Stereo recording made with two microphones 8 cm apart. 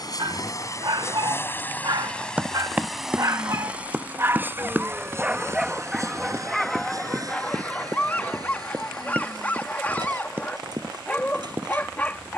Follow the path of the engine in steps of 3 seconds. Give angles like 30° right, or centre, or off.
20° left, 20° right, 50° right, 50° right.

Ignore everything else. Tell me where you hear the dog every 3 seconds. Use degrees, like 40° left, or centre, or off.
60° right, 30° right, 10° left, 20° left.